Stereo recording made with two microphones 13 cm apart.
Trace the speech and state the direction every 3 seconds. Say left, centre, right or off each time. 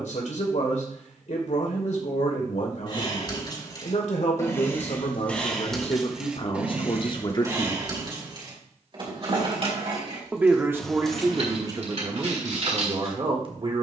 left, left, left, right, right.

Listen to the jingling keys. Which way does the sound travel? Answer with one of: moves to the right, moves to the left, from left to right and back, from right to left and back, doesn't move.
moves to the right.